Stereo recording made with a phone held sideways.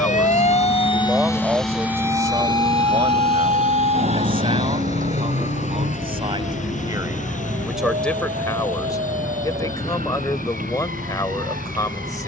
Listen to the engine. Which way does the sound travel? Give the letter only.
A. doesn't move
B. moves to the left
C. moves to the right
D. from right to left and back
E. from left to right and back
B.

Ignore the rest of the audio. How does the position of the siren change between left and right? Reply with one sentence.
You can hear the siren move to the right.